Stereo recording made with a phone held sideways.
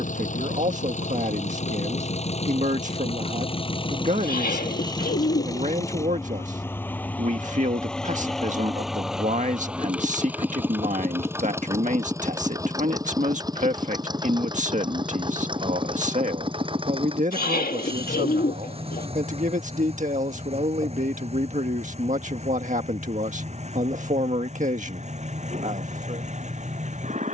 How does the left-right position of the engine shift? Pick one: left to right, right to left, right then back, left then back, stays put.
left to right.